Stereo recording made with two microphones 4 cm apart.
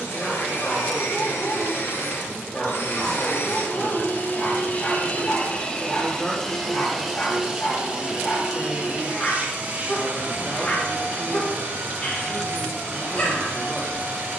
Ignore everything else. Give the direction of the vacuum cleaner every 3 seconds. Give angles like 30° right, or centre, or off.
70° left, 40° left, 10° right, 40° right, 50° right.